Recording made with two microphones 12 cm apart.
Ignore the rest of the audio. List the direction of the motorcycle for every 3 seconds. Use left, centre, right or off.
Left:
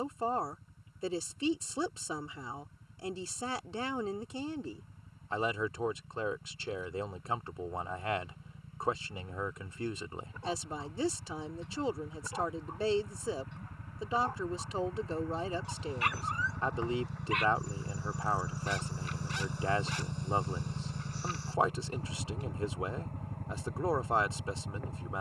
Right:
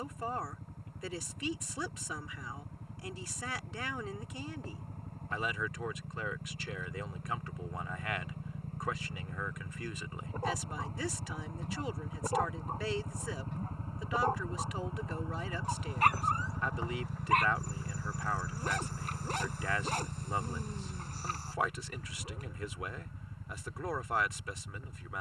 right, right, right, right, right, centre, left, left, left.